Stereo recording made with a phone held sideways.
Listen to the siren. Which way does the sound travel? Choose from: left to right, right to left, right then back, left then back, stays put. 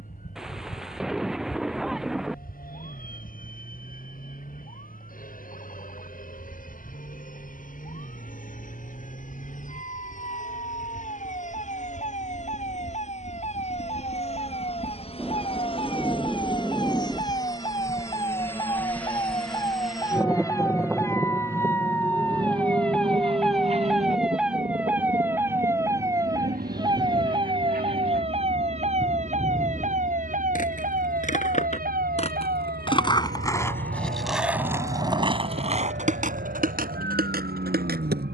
left to right.